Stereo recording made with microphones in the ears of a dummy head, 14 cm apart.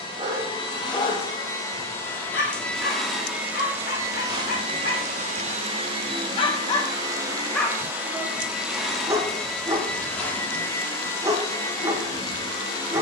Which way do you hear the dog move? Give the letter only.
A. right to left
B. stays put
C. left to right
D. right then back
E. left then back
E.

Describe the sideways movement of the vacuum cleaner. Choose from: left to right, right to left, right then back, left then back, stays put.
right then back.